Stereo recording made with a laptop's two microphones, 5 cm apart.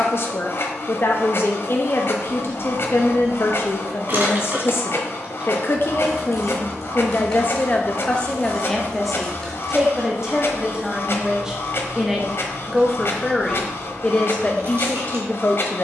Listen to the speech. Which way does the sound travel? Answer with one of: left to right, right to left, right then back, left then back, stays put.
right then back.